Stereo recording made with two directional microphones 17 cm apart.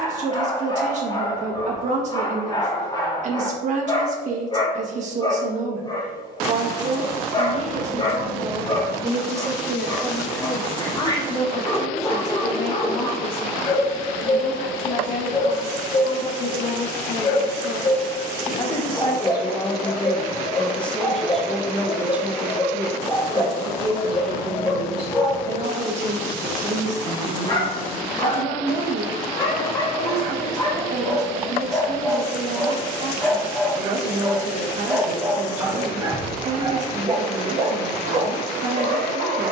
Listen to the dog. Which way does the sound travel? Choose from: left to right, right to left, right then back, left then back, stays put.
left to right.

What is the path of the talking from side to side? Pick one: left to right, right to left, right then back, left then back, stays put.
left then back.